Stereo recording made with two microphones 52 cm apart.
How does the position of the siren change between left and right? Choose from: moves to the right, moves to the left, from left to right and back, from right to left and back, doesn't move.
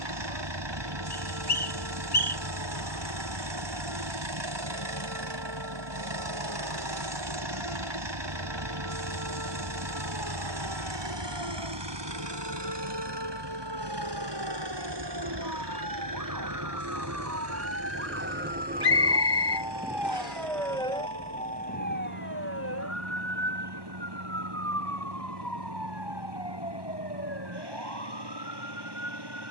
moves to the left.